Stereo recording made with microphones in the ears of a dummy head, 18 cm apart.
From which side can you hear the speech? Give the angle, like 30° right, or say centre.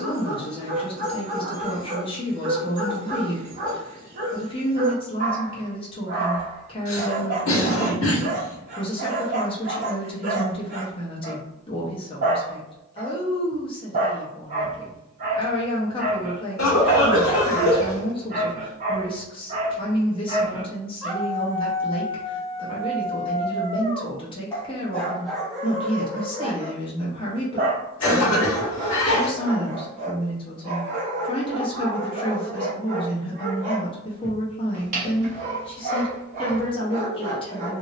30° left.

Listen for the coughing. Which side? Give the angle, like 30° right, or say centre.
80° left.